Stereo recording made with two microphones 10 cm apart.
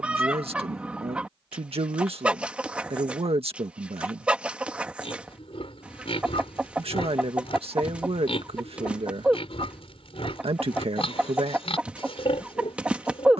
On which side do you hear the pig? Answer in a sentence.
You can hear the pig on the left.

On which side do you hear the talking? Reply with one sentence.
In this clip you hear the talking on the right.